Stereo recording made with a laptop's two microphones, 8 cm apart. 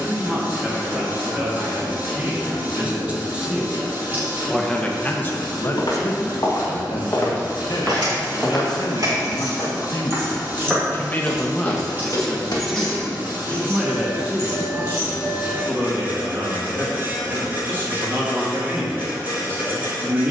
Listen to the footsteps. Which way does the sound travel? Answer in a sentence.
You can hear the footsteps move from left to right and back again.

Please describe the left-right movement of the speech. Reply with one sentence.
You can hear the speech go left and come back.